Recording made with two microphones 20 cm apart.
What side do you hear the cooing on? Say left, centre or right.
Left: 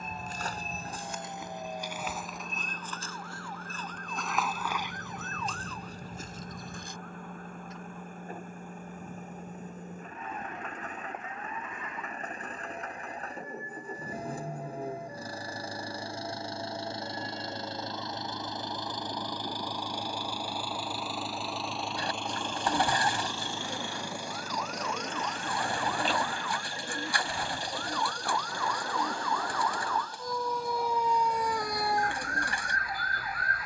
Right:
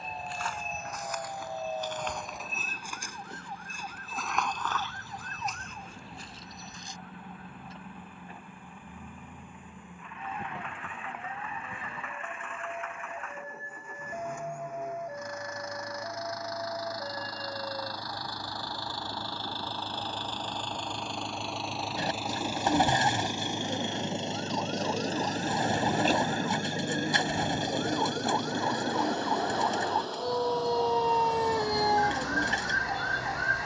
right.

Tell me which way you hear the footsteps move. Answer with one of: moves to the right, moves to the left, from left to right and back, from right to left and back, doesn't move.
from left to right and back.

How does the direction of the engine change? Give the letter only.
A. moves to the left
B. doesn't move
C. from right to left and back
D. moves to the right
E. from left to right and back
D.